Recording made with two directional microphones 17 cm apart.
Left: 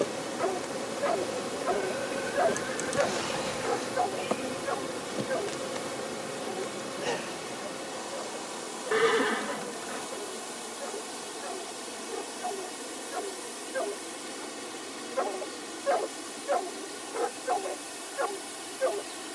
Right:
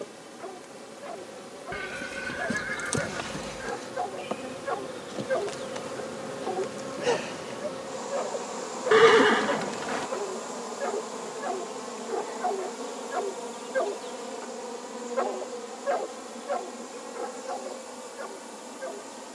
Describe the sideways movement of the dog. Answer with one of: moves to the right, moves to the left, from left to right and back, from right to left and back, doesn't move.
from left to right and back.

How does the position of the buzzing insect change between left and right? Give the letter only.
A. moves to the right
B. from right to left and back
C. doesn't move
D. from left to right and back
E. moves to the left
A.